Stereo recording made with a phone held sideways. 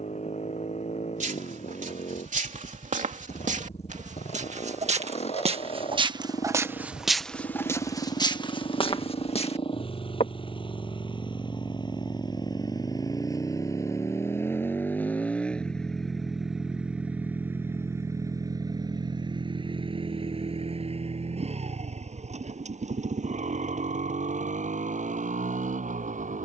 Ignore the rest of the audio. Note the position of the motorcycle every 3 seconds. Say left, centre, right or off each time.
left, left, left, left, left, centre, right, right, right.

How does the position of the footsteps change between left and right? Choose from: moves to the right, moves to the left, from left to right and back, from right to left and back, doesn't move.
moves to the left.